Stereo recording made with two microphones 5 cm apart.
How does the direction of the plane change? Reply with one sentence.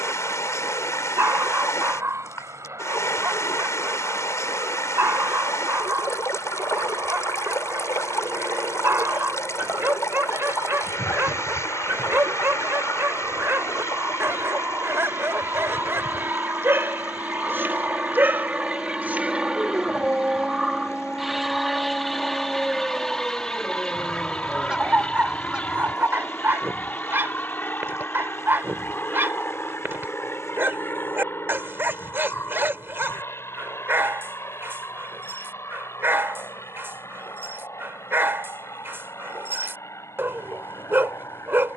In this clip you hear the plane move to the left.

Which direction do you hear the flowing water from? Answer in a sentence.
In this clip you hear the flowing water on the left.